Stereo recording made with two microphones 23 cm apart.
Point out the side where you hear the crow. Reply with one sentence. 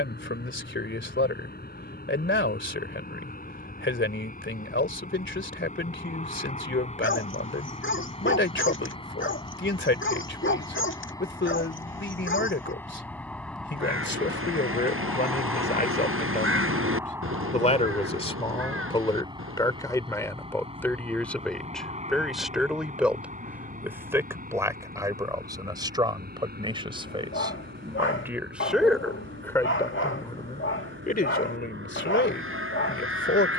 In this clip you hear the crow on the right.